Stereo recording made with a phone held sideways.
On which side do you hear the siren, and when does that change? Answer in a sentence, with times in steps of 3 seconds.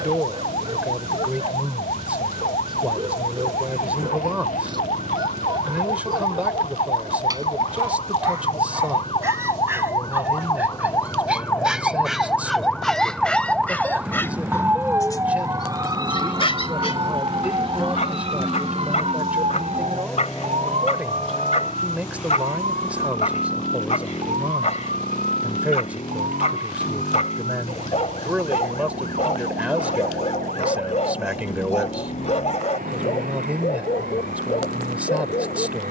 In this clip you hear the siren on the left from 0 s, in the centre from 12 s and on the right from 15 s.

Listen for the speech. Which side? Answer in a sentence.
In this clip you hear the speech in the centre.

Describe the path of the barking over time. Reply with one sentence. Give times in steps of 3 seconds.
In this clip you hear the barking on the right from 0 s, in the centre from 9 s and on the left from 15 s.